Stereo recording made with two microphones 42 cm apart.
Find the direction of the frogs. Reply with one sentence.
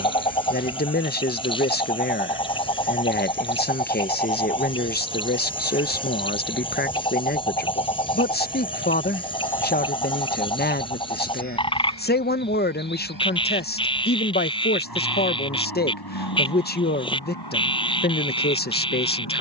In this clip you hear the frogs in the centre.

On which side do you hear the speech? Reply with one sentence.
In this clip you hear the speech on the left.